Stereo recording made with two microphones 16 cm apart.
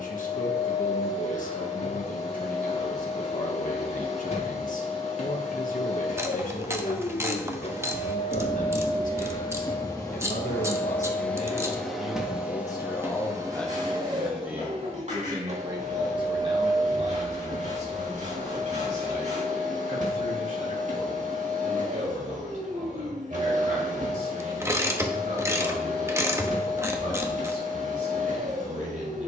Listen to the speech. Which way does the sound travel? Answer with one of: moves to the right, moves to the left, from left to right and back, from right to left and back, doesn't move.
moves to the right.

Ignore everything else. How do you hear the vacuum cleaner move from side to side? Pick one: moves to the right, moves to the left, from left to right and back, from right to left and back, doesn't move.
moves to the right.